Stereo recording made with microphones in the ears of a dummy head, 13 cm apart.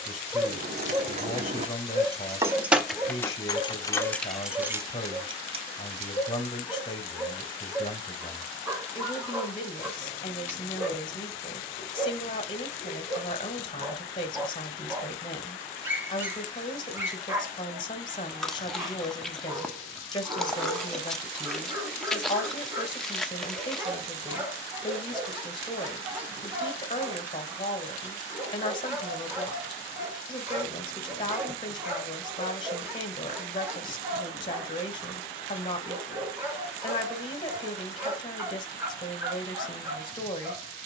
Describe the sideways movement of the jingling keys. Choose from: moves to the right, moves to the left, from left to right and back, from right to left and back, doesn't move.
from right to left and back.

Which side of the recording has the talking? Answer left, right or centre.
left.